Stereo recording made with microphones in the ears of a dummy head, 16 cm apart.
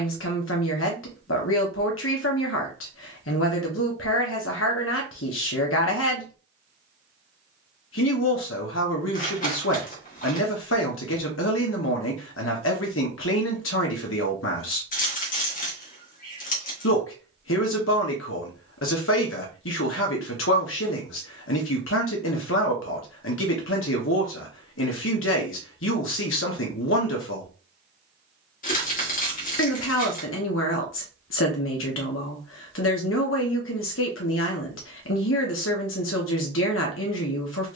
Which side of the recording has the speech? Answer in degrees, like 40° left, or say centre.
80° left.